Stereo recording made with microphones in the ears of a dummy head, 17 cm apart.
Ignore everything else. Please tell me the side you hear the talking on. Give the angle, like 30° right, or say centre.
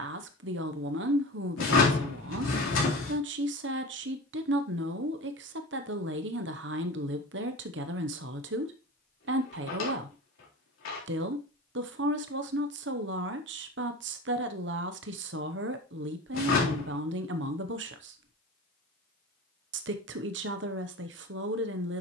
60° right.